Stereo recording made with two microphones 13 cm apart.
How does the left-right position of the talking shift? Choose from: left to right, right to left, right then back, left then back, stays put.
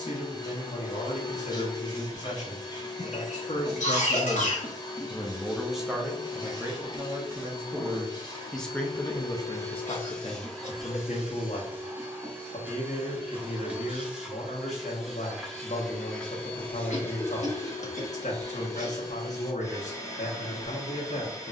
right then back.